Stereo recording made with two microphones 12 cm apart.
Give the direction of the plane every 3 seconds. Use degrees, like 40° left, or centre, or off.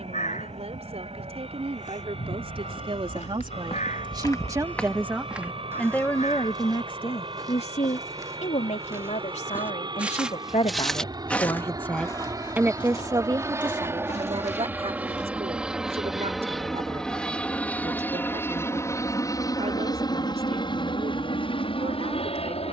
60° right, 50° right, 50° right, 40° right, 20° right, centre, 30° left, 50° left.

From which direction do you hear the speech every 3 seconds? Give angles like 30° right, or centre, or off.
60° right, 30° right, 50° left, 50° left, 40° right, 60° right, 60° right, 60° right.